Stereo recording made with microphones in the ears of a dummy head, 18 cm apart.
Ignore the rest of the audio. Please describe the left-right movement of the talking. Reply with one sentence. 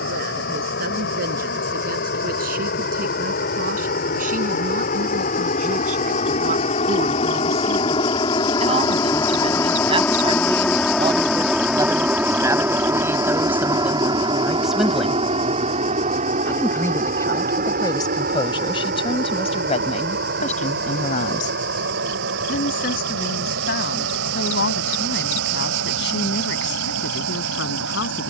In this clip you hear the talking travel towards the left.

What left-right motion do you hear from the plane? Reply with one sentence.
In this clip you hear the plane move to the right.